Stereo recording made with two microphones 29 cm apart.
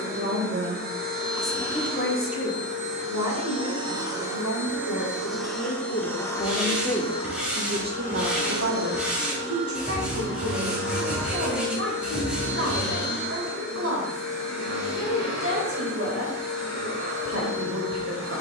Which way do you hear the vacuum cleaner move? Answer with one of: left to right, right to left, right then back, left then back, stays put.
right to left.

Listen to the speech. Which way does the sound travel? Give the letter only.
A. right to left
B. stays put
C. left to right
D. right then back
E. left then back
E.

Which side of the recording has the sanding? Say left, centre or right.
centre.